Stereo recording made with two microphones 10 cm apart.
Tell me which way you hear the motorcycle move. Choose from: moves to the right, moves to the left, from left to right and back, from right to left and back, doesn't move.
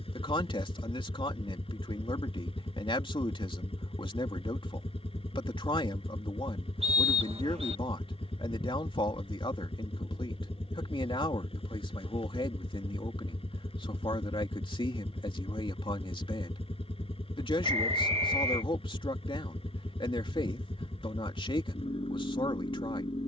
doesn't move.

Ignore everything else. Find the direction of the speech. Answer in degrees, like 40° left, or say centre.
60° left.